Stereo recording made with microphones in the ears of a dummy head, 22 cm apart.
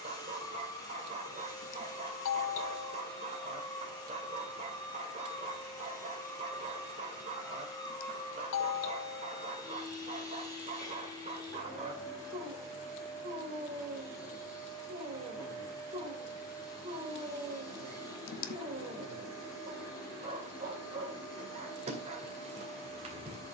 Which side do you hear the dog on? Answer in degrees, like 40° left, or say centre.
30° right.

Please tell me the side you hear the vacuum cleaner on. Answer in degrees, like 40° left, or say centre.
20° left.